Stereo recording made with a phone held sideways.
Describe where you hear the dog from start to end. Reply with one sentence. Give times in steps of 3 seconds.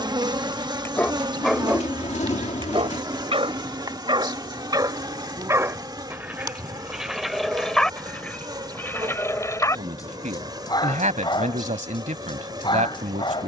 In this clip you hear the dog in the centre from 0 s, on the right from 3 s, in the centre from 6 s and on the left from 9 s.